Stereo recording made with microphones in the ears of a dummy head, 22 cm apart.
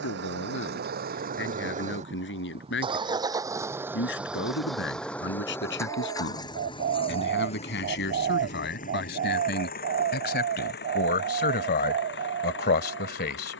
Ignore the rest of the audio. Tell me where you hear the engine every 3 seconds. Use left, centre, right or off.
right, centre, left, left, left.